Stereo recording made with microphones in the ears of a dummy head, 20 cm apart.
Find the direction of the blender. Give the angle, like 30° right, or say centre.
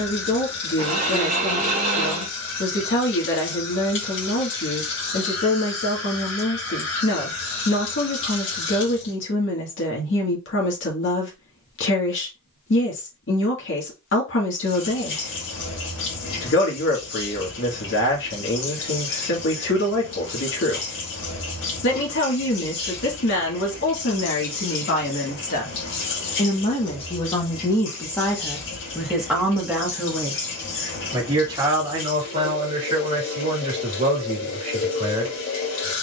40° right.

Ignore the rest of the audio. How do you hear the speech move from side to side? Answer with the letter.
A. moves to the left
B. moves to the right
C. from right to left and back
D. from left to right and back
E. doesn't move
B.